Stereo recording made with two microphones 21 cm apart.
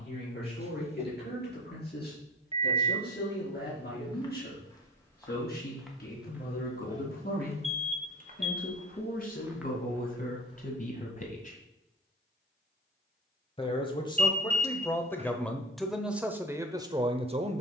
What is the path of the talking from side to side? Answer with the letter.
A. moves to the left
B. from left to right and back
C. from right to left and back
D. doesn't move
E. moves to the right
E.